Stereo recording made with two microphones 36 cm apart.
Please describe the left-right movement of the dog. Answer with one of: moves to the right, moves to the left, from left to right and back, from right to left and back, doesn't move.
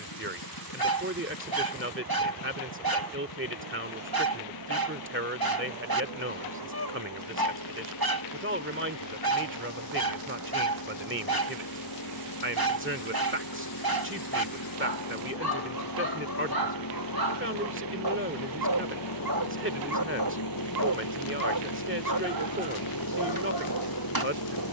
doesn't move.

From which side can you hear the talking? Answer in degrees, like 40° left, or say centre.
30° right.